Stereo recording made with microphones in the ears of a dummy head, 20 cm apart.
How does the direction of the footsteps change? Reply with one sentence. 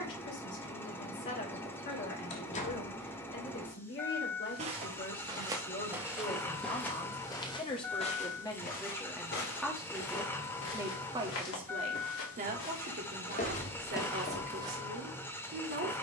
In this clip you hear the footsteps move from right to left and back again.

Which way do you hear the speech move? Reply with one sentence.
In this clip you hear the speech go from the left side to the right.